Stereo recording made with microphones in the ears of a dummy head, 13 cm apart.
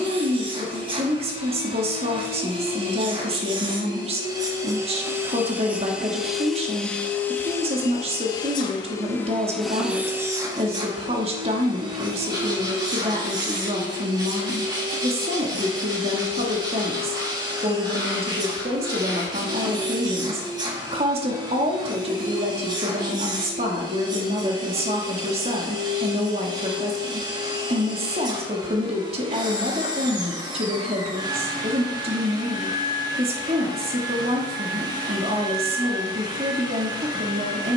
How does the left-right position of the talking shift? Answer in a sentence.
You can hear the talking stay put.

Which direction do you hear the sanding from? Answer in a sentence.
In this clip you hear the sanding on the right.